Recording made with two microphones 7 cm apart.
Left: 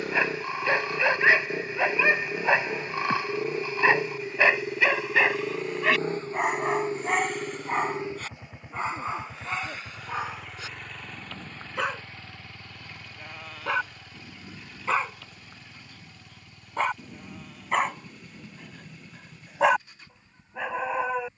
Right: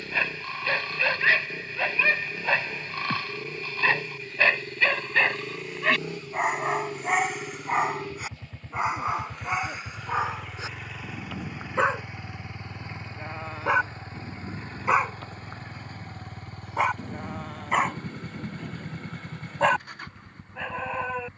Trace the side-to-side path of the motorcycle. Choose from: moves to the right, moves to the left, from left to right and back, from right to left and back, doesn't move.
moves to the right.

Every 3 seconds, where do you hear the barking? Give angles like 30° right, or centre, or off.
20° left, 10° left, 10° right, 20° right, 20° right, 10° right, 10° left.